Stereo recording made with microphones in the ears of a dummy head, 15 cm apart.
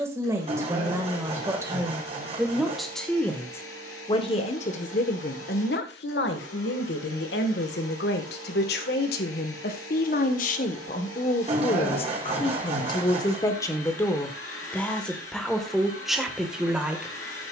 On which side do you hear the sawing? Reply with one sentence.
You can hear the sawing on the right.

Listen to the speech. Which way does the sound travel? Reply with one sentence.
In this clip you hear the speech go left and come back.